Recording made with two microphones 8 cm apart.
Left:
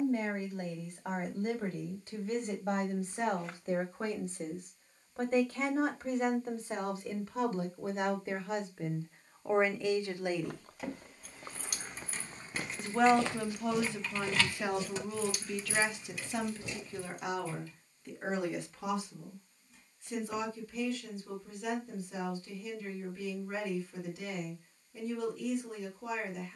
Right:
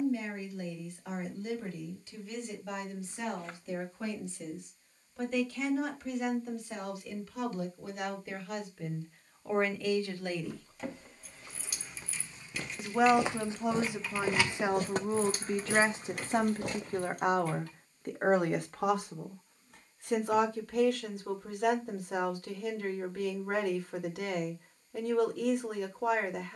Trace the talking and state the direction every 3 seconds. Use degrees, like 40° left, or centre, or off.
50° left, 40° left, 30° left, 20° left, 10° right, 40° right, 60° right, 70° right, 70° right.